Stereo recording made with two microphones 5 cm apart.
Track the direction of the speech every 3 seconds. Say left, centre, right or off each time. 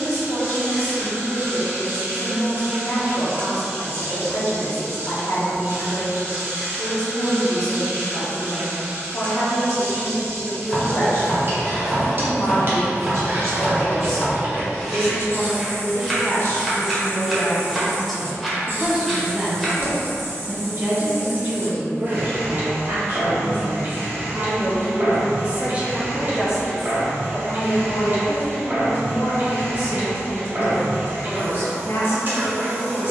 left, left, left, left, left, left, right, right, right, left, left.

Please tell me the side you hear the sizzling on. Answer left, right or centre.
right.